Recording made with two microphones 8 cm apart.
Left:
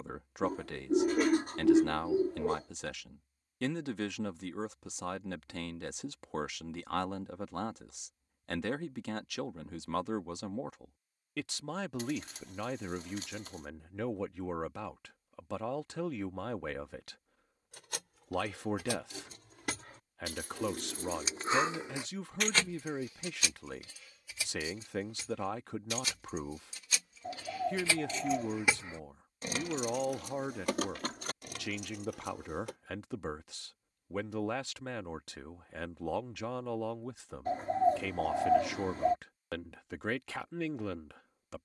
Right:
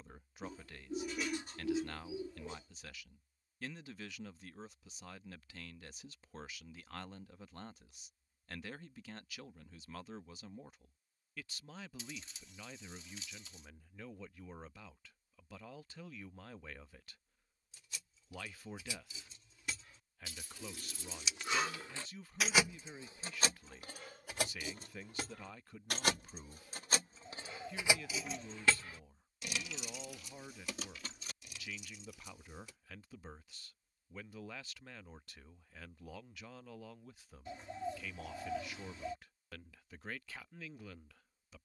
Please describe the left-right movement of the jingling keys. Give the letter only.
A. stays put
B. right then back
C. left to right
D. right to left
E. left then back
B.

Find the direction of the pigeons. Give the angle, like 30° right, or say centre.
60° left.